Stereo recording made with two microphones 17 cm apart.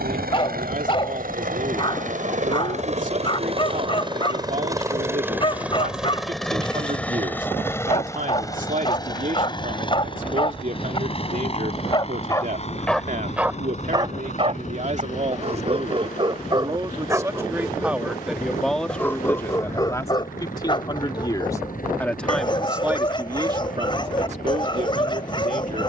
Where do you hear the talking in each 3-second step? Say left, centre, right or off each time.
right, right, right, right, right, right, centre, centre, right.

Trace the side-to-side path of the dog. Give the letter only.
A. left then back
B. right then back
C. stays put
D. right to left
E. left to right
B.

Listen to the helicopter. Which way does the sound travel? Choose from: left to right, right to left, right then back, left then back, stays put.
right to left.